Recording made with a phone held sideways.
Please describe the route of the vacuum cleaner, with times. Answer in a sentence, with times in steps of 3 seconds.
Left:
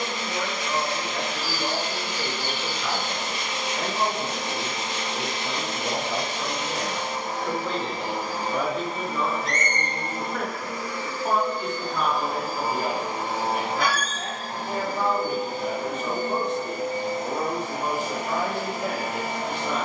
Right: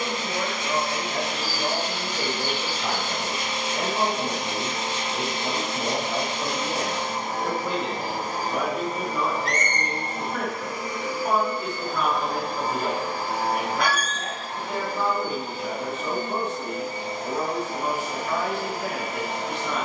In this clip you hear the vacuum cleaner on the right from 0 s and on the left from 12 s.